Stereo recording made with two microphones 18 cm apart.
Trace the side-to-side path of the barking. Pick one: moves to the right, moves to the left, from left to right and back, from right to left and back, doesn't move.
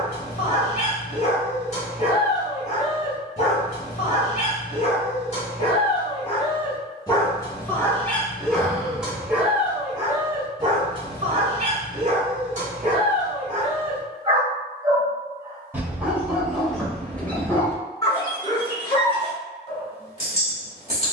from left to right and back.